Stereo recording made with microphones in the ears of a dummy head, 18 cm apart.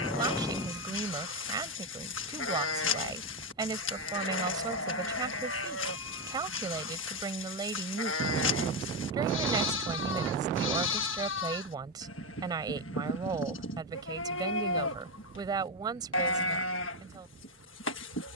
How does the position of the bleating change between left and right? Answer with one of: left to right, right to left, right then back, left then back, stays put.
stays put.